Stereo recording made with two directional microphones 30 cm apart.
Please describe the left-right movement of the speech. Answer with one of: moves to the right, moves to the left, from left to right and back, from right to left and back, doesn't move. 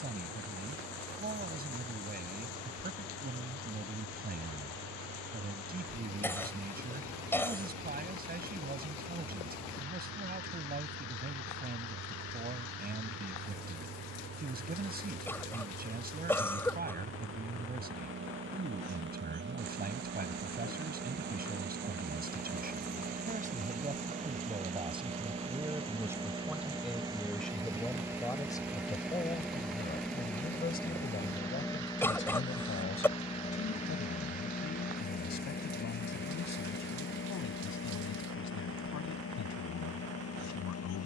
moves to the left.